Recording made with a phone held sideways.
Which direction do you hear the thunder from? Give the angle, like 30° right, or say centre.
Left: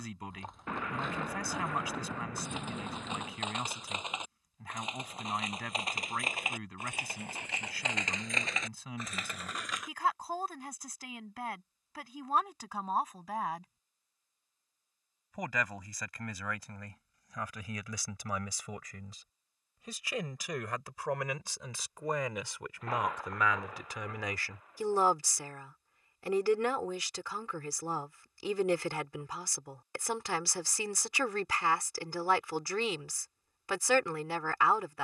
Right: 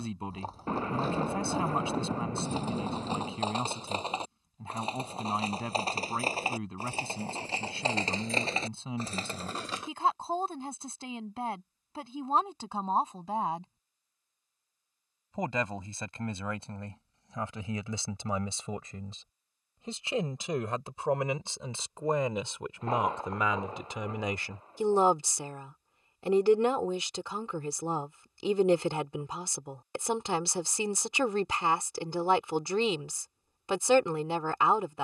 30° right.